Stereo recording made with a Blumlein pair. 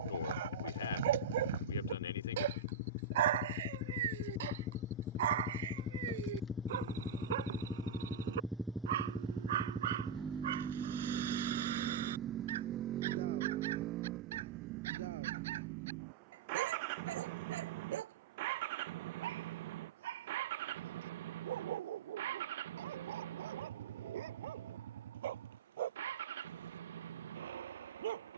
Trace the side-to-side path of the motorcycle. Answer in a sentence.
In this clip you hear the motorcycle travel towards the right.